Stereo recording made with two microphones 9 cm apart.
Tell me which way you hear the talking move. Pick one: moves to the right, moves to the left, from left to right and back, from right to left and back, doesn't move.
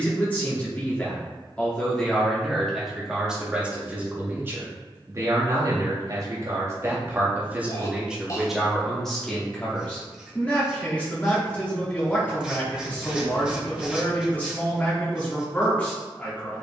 from left to right and back.